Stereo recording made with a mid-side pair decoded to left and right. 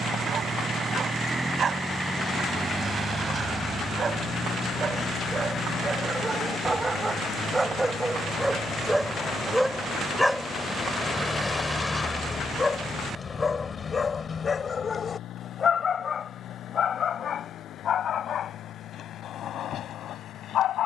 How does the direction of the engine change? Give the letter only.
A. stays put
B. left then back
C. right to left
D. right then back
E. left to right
C.